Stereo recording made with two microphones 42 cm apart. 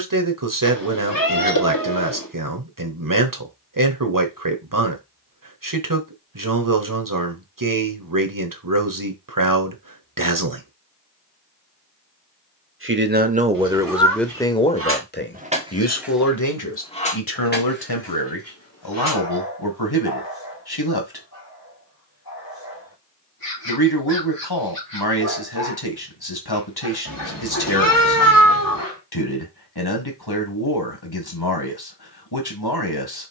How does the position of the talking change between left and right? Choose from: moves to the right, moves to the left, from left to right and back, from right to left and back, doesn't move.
moves to the left.